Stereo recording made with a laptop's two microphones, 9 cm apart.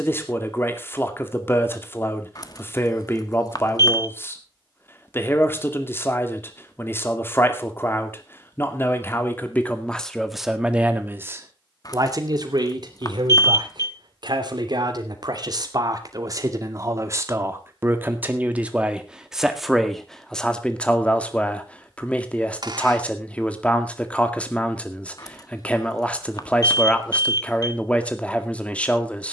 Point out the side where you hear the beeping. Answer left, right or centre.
left.